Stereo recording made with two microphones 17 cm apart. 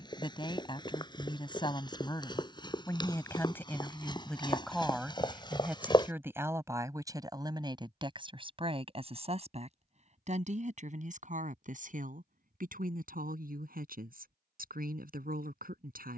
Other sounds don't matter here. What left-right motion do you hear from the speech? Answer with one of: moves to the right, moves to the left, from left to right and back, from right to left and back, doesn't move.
moves to the right.